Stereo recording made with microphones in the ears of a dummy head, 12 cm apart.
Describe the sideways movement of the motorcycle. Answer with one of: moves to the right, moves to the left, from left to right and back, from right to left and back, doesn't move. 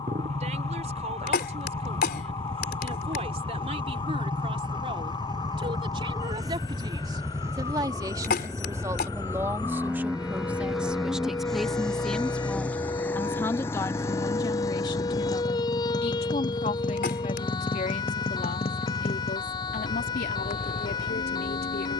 moves to the left.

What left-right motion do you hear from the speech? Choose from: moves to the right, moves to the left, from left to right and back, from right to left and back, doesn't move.
moves to the left.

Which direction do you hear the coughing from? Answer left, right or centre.
left.